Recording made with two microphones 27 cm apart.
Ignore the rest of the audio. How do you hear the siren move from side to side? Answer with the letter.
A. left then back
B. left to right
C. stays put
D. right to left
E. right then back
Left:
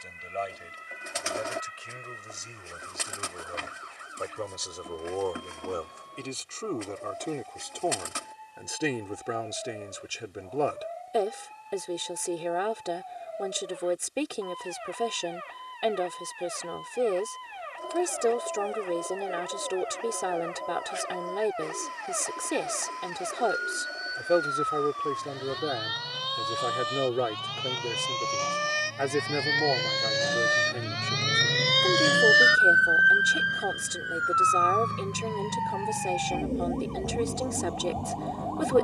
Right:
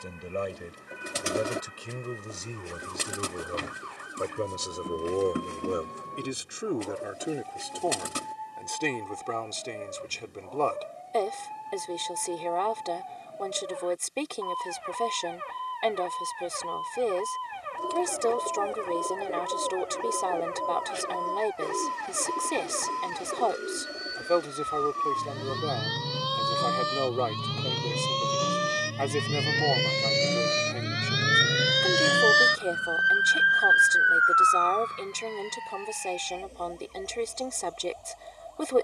D.